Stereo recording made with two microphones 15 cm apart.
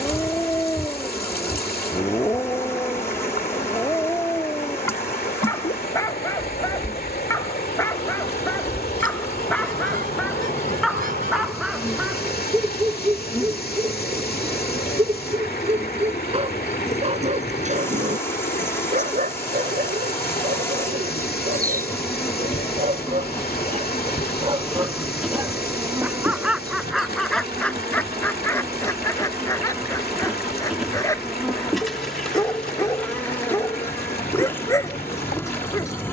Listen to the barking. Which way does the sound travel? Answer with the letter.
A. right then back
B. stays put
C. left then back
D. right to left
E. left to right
A.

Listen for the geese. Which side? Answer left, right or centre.
right.